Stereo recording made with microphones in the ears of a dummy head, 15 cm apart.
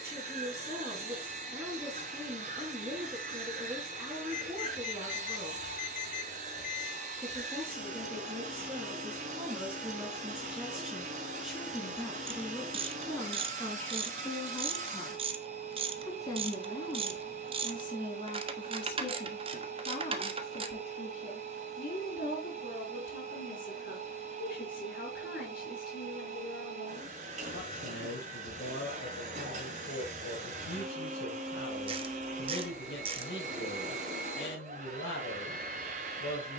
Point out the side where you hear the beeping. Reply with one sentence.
In this clip you hear the beeping on the left.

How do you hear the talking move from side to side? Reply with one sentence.
In this clip you hear the talking move to the left.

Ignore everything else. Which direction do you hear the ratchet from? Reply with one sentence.
In this clip you hear the ratchet on the right.